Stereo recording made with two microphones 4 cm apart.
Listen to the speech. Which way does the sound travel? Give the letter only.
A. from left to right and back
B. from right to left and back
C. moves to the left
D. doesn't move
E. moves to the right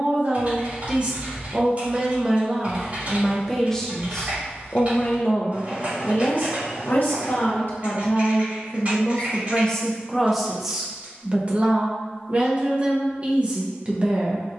B.